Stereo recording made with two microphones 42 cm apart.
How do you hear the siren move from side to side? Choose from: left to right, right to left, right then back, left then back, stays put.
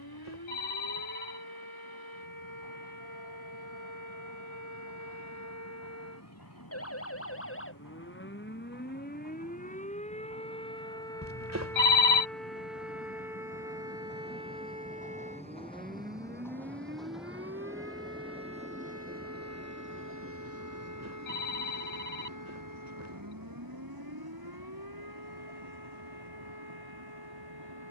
left to right.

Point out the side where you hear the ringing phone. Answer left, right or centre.
right.